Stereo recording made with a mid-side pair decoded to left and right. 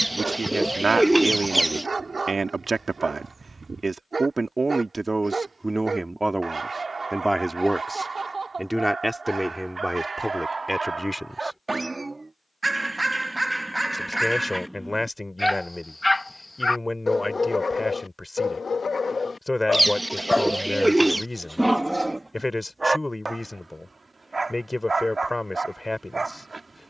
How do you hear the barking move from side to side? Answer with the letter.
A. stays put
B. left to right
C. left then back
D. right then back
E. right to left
C.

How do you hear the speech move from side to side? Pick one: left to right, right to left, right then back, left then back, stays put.
right to left.